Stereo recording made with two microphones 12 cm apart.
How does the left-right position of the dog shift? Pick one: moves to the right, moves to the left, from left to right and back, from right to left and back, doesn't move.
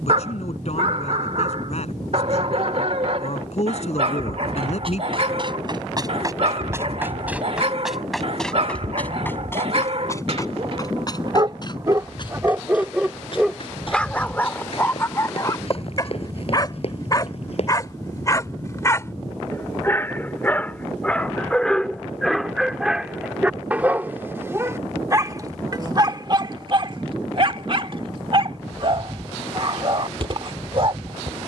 from right to left and back.